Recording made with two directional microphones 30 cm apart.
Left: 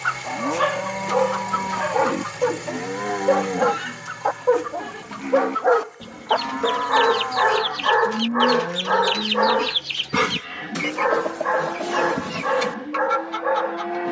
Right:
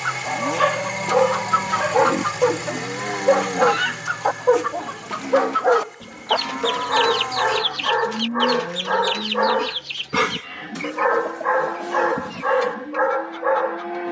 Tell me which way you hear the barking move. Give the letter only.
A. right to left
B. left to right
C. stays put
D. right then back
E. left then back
E.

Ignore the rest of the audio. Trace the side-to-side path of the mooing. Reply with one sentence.
You can hear the mooing stay in one place.